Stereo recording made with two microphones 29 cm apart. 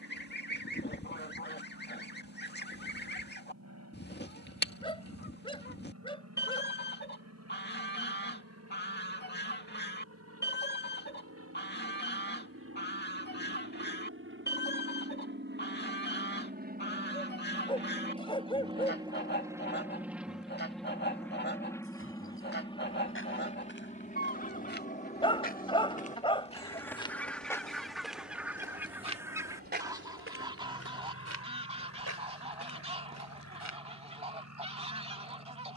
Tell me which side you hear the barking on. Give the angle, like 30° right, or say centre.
20° left.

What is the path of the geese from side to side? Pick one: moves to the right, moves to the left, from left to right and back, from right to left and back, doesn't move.
moves to the right.